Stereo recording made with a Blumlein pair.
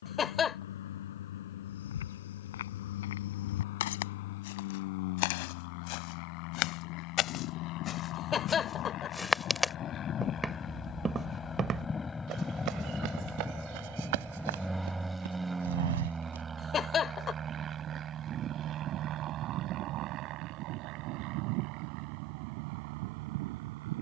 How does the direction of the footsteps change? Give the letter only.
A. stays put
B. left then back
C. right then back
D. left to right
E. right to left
D.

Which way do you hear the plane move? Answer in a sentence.
You can hear the plane move from left to right.